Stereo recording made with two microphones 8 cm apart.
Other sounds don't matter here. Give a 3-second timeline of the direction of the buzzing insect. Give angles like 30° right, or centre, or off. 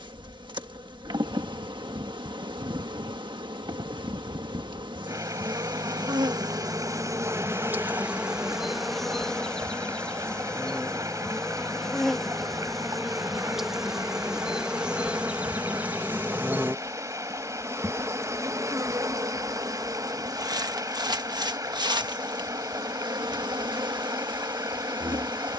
70° right, 70° right, 30° right, 10° left, centre, 20° right, 50° right, 60° right, 70° right.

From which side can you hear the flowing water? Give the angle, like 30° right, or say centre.
40° right.